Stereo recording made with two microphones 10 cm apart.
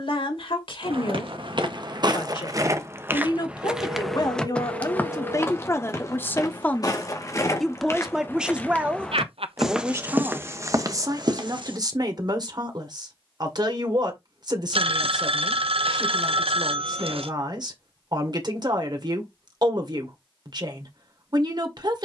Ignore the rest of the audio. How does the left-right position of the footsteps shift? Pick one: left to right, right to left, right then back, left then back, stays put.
left then back.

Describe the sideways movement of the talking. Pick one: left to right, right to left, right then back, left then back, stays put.
left to right.